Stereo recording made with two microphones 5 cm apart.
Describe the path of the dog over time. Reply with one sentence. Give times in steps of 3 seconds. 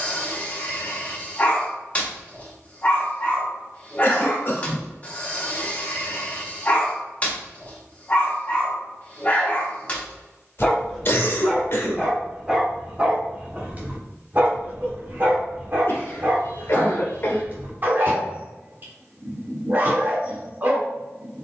You can hear the dog on the left from 0 s, in the centre from 9 s and on the right from 12 s.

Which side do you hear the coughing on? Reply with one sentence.
You can hear the coughing on the left.